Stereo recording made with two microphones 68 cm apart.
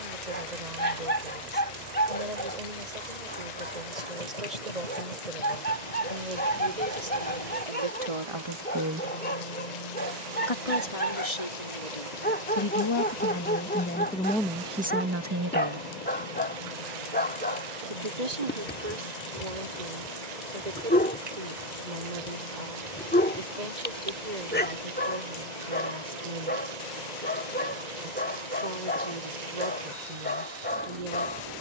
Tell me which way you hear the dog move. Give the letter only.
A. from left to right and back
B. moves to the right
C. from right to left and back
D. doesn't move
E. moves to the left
D.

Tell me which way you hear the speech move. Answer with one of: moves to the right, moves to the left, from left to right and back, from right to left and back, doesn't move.
from right to left and back.